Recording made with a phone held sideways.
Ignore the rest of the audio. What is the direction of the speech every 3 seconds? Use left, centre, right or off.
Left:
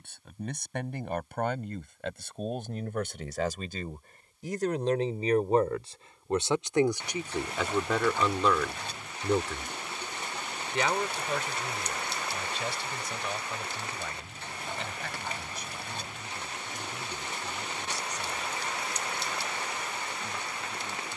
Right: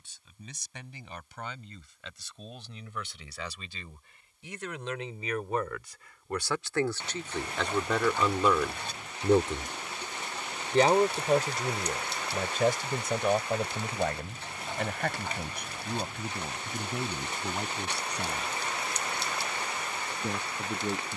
left, left, centre, right, right, right, right.